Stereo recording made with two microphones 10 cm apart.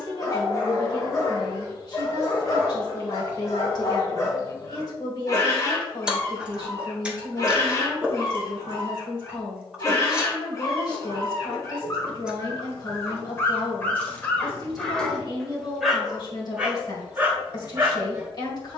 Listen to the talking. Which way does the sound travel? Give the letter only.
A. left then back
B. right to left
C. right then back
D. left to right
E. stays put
E.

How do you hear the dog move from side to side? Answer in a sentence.
In this clip you hear the dog go from the left side to the right.